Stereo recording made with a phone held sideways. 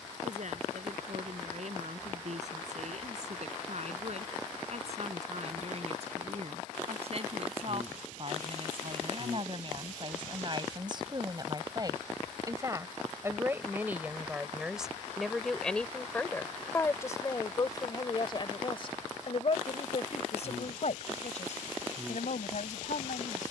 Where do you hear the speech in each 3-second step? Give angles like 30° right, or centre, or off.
60° right, 50° right, 50° right, 40° right, 10° right, 20° left, 50° left, 70° left.